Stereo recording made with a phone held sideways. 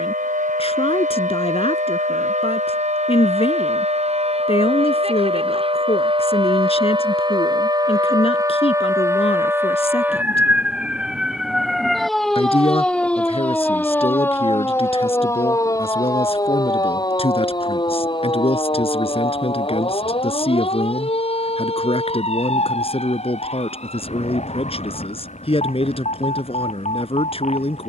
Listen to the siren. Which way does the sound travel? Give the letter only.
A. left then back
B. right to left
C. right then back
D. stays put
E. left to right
B.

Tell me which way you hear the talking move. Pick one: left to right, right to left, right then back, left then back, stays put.
stays put.